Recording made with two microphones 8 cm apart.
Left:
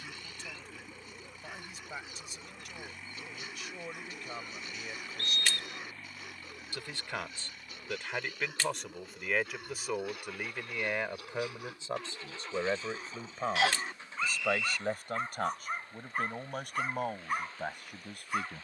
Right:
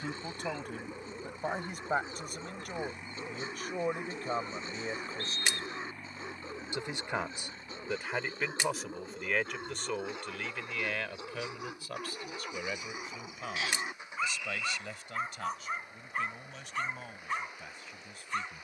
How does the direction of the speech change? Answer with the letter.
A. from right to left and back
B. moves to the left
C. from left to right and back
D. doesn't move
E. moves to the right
B.